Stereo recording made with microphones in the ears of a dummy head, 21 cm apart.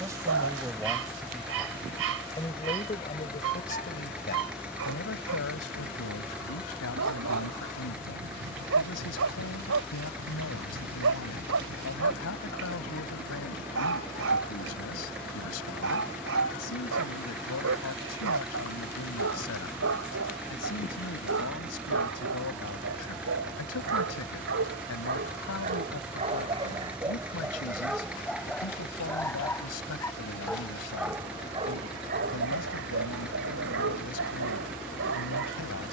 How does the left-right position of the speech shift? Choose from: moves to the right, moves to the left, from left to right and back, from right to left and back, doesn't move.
moves to the left.